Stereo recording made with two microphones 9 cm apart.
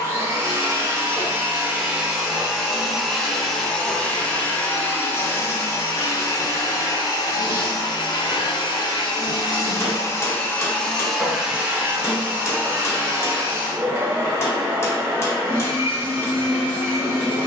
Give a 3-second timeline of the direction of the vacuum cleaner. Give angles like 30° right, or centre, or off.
10° right, 20° left, 40° left, 20° left, 20° right, 20° right.